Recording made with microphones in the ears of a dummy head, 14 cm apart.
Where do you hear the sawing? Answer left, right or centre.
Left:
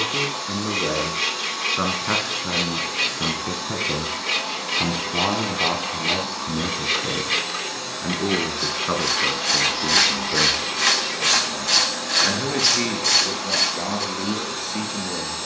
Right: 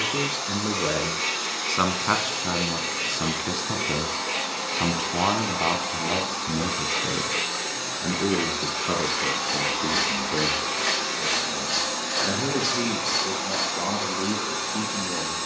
left.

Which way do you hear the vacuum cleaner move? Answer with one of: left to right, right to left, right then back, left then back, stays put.
stays put.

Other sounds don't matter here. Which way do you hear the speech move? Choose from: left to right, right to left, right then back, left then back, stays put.
right to left.